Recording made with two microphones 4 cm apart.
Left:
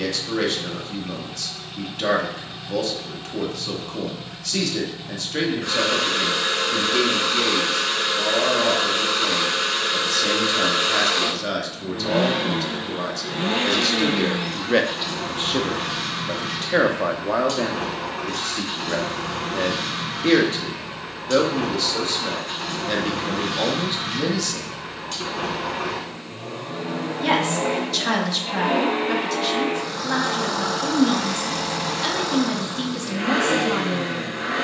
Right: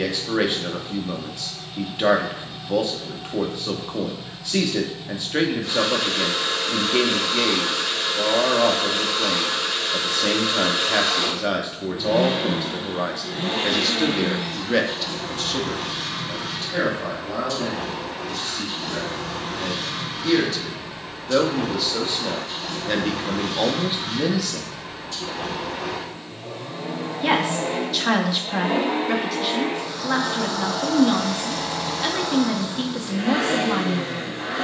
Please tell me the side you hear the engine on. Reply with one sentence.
You can hear the engine on the left.